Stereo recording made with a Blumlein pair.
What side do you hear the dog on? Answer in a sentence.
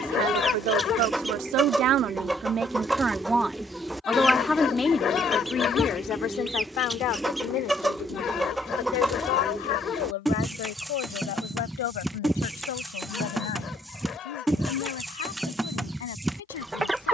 You can hear the dog on the left.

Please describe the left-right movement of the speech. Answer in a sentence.
In this clip you hear the speech move to the left.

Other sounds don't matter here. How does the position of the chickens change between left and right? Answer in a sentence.
In this clip you hear the chickens stay put.